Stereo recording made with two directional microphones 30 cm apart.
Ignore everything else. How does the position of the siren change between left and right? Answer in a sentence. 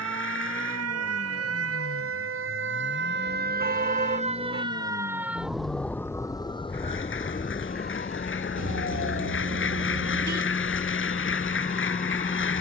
You can hear the siren travel towards the left.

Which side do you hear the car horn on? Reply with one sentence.
You can hear the car horn on the right.